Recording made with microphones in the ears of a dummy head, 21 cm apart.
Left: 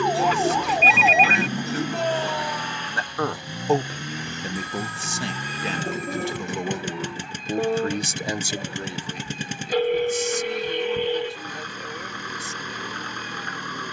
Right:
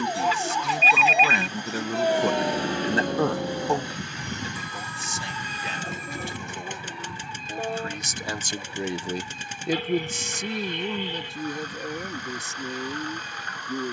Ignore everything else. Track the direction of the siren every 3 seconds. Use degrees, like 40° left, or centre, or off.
10° left, 60° right, 80° right, 80° right, 80° right.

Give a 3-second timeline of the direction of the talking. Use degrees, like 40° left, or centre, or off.
60° right, 40° left, 30° left, 60° right, 80° right.